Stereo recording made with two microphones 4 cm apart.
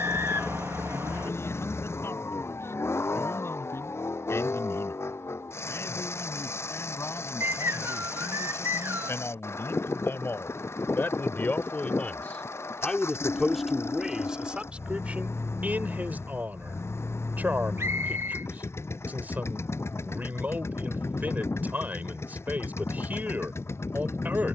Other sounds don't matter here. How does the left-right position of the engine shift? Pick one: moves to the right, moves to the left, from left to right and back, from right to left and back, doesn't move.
doesn't move.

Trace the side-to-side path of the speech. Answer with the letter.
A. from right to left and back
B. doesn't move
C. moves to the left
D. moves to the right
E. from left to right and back
D.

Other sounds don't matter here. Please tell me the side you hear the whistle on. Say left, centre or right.
right.